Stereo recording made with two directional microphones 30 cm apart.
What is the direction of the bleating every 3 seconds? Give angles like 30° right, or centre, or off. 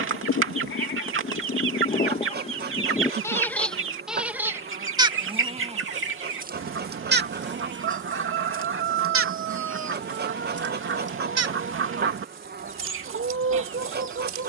30° left, 10° right, 40° right, 50° right, 60° right.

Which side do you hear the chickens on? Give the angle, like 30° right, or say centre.
40° right.